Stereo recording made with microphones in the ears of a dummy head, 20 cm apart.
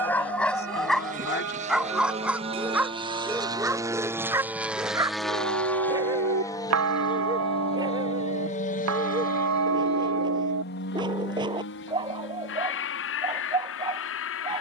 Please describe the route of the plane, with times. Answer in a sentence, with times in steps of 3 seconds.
In this clip you hear the plane on the right from 0 s, in the centre from 3 s and on the left from 6 s.